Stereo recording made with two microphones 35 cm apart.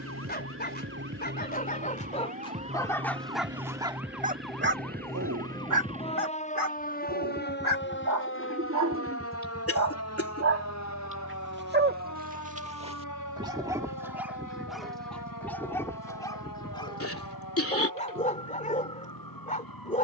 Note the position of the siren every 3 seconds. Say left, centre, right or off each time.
right, centre, left, left, left, left, left.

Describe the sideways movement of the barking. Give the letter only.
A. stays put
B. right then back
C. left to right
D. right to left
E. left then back
B.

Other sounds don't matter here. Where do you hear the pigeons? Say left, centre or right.
right.